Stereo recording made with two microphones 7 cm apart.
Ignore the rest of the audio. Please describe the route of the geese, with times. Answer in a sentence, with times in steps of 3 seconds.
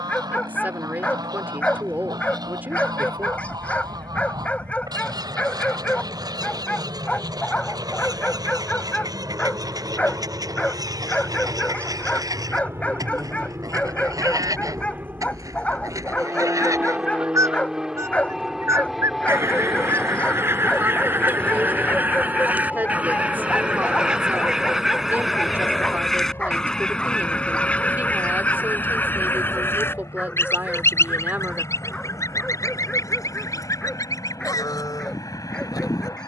You can hear the geese on the right from 0 s, in the centre from 24 s and on the left from 27 s.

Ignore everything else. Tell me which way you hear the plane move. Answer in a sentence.
In this clip you hear the plane go from the right side to the left.